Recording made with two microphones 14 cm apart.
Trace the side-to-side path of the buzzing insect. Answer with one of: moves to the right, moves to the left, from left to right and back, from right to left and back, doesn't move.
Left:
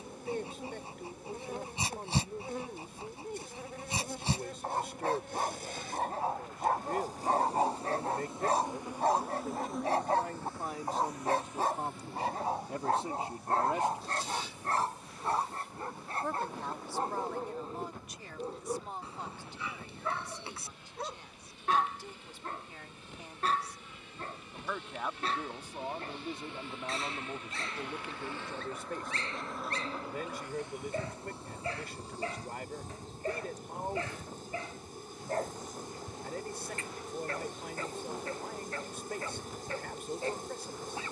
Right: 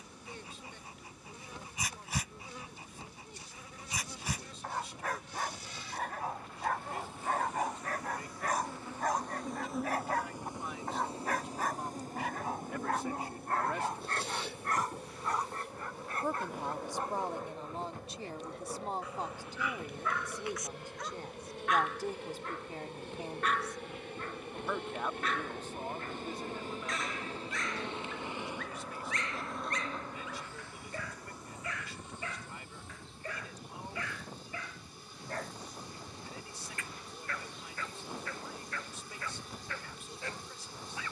from left to right and back.